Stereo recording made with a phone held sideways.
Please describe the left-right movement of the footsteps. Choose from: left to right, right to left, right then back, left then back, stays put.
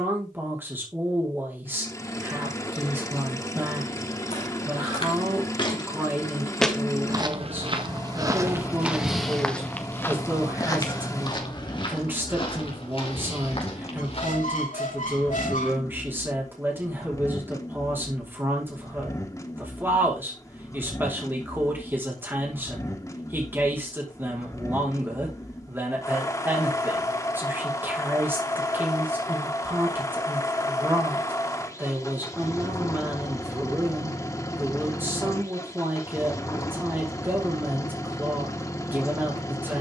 right then back.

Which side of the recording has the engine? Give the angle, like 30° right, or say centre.
20° left.